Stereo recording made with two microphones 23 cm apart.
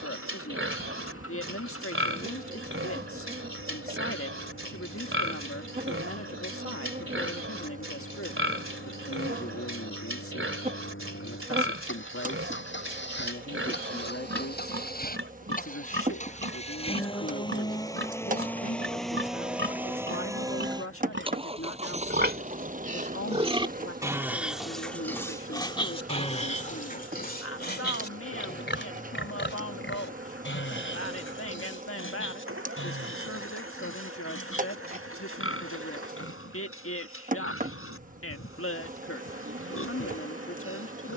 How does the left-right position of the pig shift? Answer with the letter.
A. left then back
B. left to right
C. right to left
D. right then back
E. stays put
C.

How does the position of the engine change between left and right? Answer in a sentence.
You can hear the engine move to the right.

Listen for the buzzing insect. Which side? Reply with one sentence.
You can hear the buzzing insect on the right.